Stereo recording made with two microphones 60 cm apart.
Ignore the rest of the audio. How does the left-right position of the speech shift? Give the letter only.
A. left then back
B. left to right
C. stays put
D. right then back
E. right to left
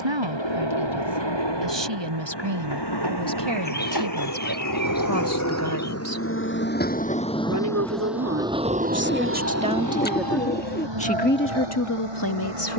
E.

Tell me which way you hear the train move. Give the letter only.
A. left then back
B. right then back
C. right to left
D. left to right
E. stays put
D.